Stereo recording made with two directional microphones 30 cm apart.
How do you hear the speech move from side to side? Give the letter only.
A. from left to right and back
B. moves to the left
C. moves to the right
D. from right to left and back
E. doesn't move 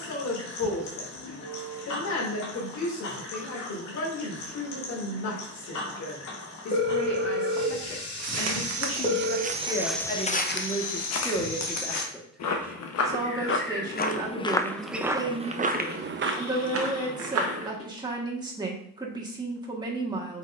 C.